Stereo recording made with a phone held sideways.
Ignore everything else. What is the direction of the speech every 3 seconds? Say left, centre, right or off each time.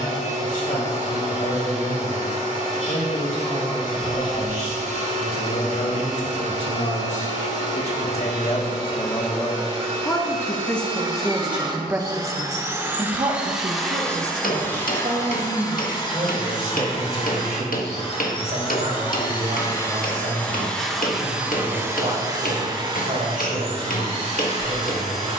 left, left, left, centre, right, right, right, right, right.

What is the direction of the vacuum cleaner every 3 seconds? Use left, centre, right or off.
right, right, right, right, centre, left, left, right, right.